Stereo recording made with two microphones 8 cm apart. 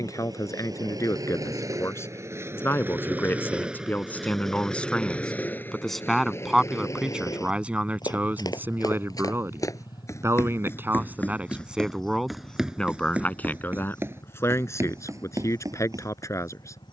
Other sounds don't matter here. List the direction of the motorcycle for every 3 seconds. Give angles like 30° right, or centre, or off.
50° right, centre, 40° left, 60° left, 70° left, 70° left.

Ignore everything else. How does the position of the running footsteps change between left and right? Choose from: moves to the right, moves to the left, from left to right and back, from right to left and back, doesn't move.
moves to the right.